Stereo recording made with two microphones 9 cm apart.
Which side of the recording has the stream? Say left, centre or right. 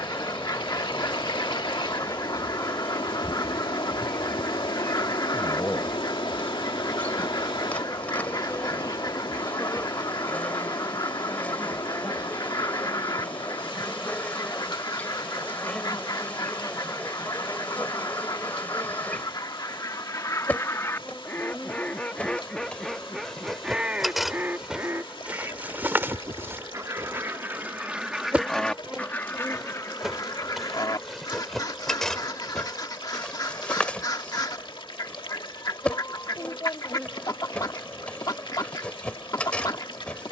left.